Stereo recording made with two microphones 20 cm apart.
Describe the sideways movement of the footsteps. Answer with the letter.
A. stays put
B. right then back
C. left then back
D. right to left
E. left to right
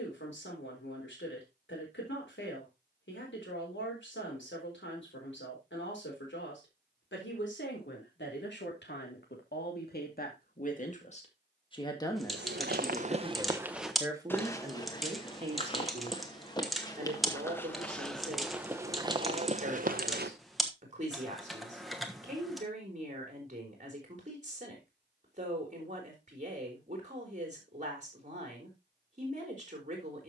C.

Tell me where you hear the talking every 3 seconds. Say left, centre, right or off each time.
left, left, left, left, centre, right, right, right, right, right.